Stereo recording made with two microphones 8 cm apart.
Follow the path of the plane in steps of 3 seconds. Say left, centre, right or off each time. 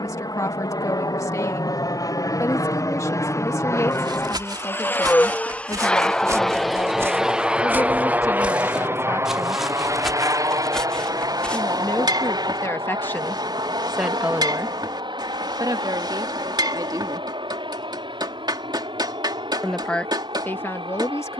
left, left, centre, right, right, right, right.